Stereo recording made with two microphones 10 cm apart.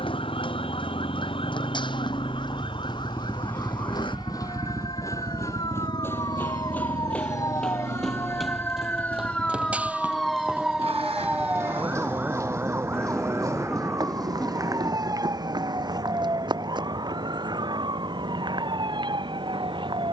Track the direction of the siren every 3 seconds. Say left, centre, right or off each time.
left, left, left, centre, right, right, right.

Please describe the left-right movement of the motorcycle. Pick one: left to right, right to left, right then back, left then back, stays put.
left to right.